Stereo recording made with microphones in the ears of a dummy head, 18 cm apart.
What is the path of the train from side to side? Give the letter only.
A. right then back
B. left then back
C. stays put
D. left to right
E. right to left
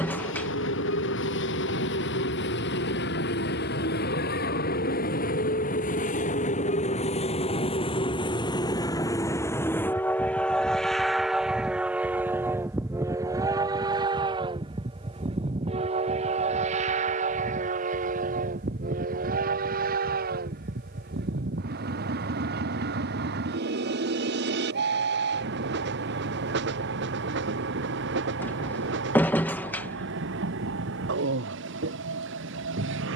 D.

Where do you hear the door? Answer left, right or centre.
centre.